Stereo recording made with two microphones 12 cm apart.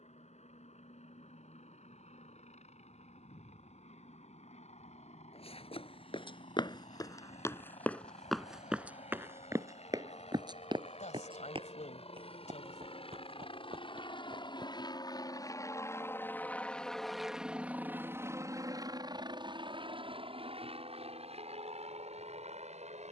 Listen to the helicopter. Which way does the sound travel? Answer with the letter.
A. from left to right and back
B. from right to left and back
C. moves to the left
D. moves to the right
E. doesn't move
D.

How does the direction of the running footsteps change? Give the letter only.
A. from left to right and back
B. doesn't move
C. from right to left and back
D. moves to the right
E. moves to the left
D.